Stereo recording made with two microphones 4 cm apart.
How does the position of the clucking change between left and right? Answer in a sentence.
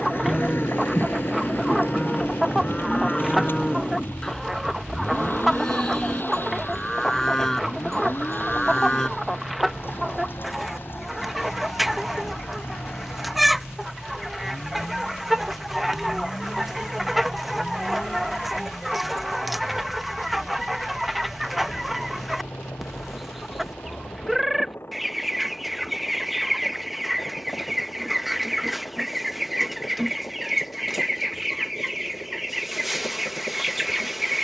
You can hear the clucking stay put.